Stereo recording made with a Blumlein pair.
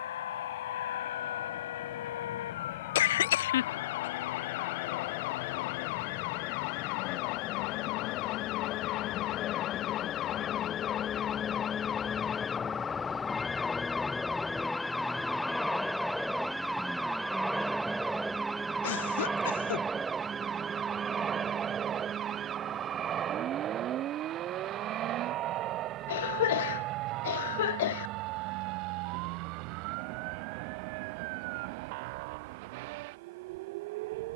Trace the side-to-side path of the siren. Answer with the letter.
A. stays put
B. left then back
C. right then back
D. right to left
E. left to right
E.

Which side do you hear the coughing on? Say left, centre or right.
left.